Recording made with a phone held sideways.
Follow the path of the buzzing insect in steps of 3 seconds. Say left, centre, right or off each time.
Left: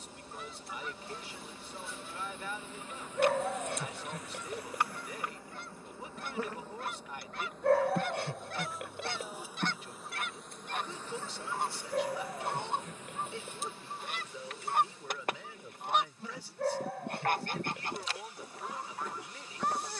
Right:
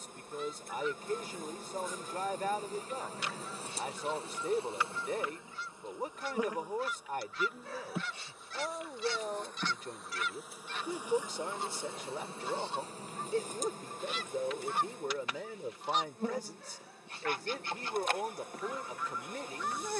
right, right, centre, centre, right, right, right.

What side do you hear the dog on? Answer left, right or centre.
left.